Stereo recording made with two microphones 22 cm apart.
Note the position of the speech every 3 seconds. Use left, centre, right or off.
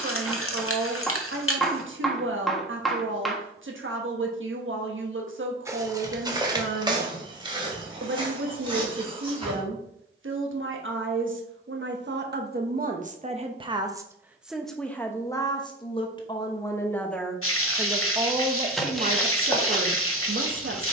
right, right, right, right, right, centre, right.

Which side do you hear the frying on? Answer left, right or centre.
left.